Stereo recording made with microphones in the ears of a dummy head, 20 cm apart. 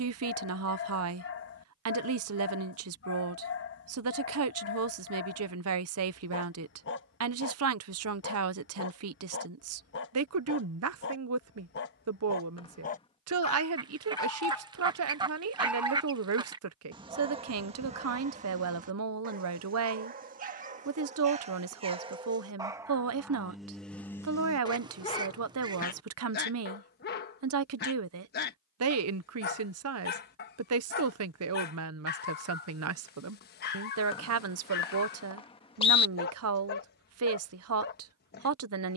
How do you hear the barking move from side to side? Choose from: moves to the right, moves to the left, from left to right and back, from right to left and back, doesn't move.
from left to right and back.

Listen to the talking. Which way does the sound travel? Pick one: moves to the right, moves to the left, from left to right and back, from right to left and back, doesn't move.
doesn't move.